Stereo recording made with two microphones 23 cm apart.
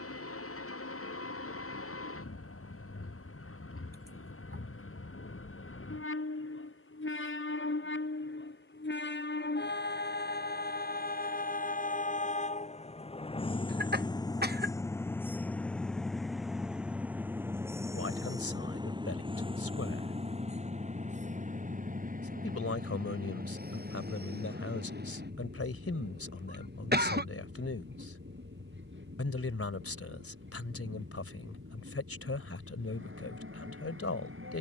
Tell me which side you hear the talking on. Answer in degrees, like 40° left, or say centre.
70° left.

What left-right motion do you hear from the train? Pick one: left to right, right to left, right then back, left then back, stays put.
left to right.